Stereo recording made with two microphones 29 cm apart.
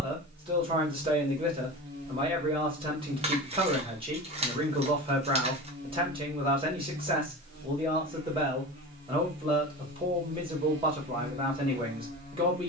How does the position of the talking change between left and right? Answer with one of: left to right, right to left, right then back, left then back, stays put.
stays put.